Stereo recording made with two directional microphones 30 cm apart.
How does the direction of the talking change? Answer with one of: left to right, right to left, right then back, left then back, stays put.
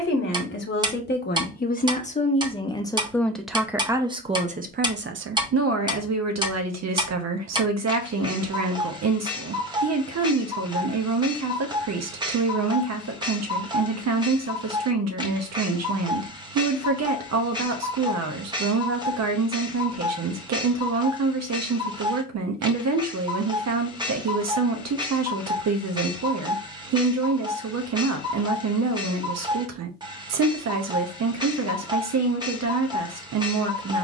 left to right.